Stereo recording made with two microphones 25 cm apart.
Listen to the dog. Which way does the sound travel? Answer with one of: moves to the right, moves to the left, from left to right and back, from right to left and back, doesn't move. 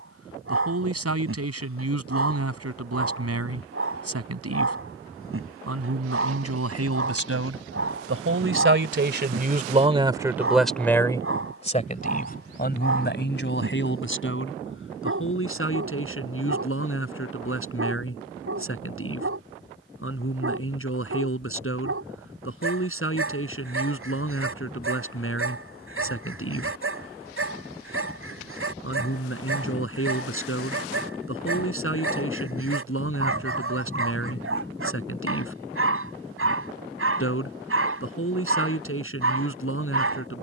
doesn't move.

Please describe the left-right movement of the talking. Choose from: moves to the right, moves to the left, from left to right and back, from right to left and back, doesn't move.
moves to the left.